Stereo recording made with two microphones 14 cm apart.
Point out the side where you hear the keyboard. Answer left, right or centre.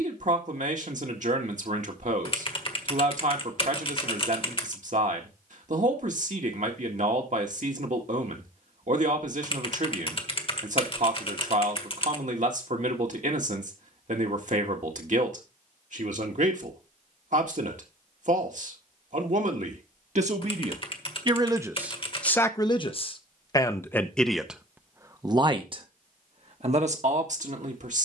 left.